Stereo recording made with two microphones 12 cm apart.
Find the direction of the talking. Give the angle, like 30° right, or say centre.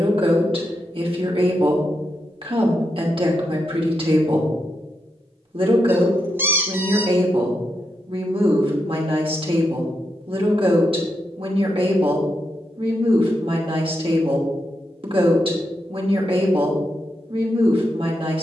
60° right.